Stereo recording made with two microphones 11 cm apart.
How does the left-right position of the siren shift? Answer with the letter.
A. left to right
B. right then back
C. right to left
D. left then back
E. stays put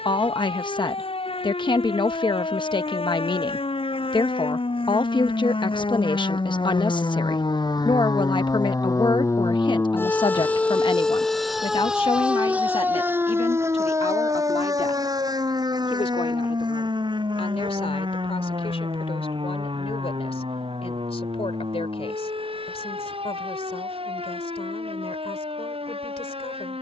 A.